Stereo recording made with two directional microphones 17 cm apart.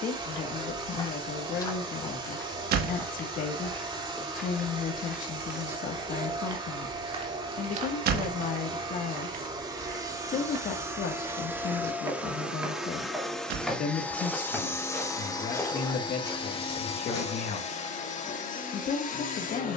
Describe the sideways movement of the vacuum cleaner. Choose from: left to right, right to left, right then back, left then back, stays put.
right to left.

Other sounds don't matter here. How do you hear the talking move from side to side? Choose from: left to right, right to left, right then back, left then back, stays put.
stays put.